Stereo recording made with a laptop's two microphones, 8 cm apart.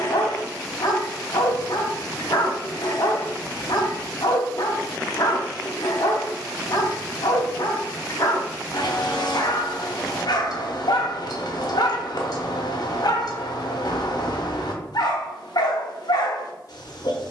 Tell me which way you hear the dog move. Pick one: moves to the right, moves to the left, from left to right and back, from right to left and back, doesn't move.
doesn't move.